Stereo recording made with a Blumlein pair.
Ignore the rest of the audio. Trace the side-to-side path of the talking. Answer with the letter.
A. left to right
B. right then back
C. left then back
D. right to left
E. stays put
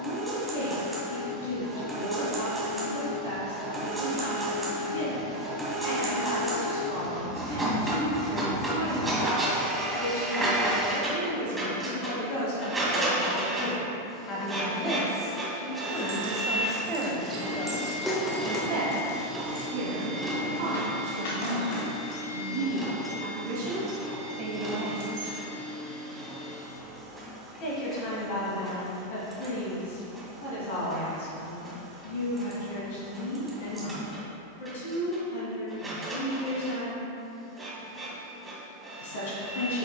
B.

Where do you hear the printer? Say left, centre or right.
centre.